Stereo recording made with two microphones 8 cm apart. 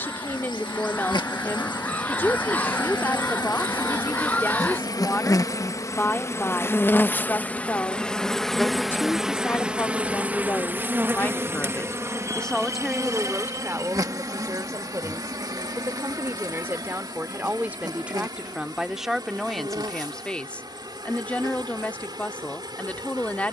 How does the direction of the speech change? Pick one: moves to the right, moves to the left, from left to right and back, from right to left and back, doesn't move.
from left to right and back.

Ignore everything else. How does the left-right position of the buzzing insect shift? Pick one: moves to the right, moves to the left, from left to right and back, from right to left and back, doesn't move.
moves to the right.